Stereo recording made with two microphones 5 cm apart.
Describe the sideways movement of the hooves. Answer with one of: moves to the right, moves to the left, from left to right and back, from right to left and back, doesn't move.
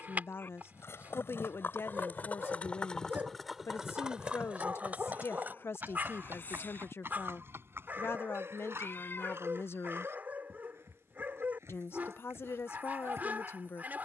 moves to the right.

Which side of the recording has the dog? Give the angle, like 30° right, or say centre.
40° right.